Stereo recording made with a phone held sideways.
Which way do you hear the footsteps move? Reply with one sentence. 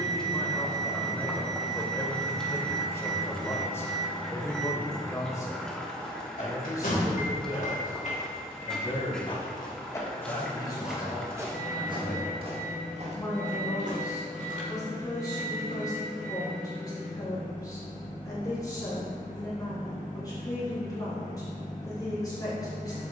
You can hear the footsteps move from left to right.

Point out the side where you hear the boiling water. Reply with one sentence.
You can hear the boiling water in the centre.